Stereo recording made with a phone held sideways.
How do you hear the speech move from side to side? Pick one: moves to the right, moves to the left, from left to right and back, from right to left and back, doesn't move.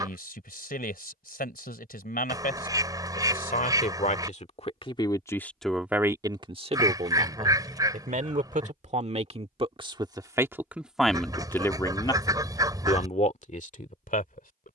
from left to right and back.